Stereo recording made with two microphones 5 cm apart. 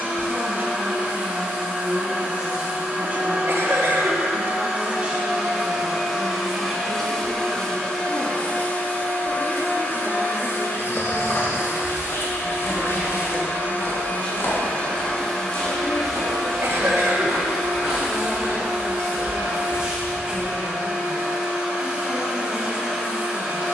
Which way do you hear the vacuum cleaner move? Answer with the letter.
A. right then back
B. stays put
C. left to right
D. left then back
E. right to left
D.